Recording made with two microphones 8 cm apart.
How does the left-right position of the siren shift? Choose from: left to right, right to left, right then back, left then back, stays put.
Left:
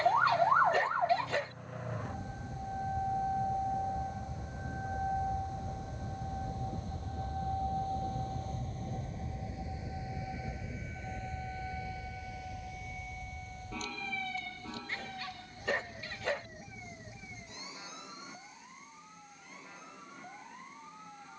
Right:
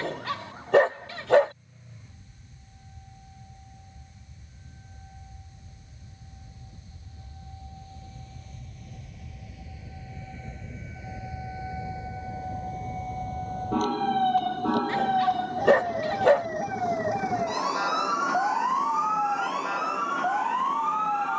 left to right.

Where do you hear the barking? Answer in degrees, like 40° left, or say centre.
70° right.